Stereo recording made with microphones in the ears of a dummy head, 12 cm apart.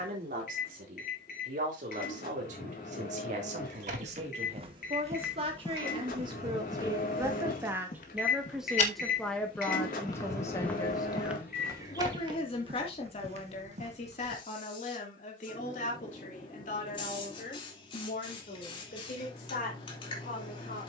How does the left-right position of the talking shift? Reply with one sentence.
In this clip you hear the talking travel towards the left.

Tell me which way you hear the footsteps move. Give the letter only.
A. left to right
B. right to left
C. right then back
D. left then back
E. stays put
D.